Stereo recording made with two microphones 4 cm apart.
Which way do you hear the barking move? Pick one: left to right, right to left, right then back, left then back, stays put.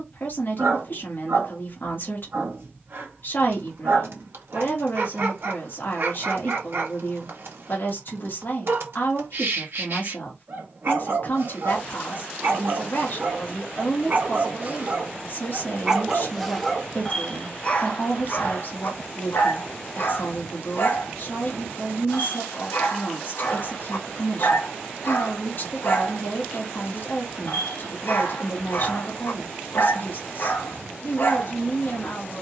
right to left.